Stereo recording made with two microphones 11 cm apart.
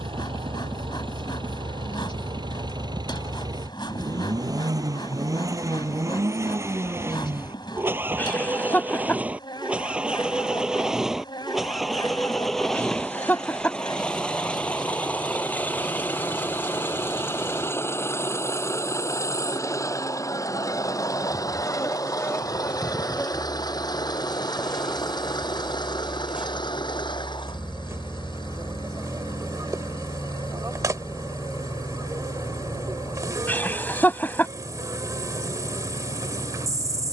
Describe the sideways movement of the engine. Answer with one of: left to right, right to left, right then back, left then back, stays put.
right to left.